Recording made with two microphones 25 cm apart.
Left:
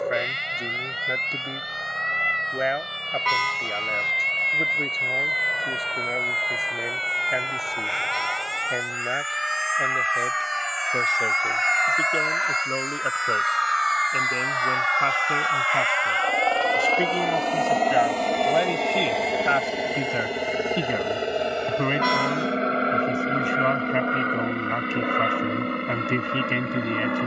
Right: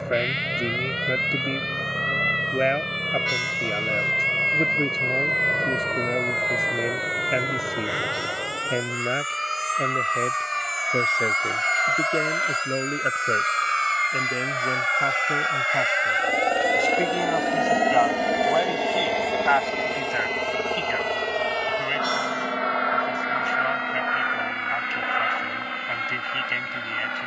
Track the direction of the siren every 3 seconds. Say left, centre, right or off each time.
left, left, left, centre, right, right, right, right, right.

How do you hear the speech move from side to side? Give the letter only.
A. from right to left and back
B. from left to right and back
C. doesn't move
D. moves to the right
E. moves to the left
E.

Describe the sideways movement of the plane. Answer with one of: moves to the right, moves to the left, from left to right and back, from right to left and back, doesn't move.
moves to the left.